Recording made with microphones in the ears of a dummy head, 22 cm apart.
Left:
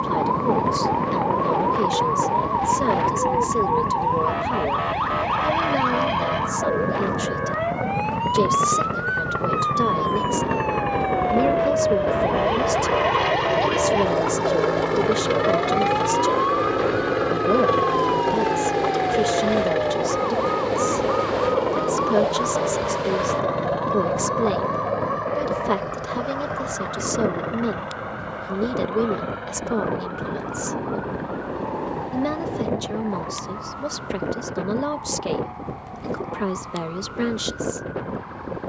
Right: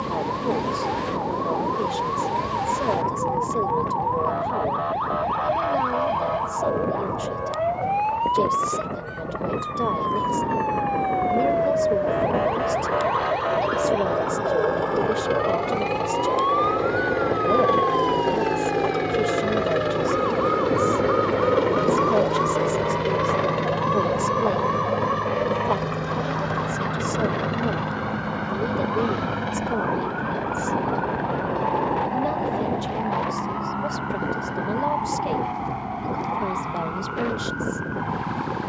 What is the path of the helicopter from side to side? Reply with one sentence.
You can hear the helicopter move to the right.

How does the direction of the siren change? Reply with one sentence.
In this clip you hear the siren move from left to right.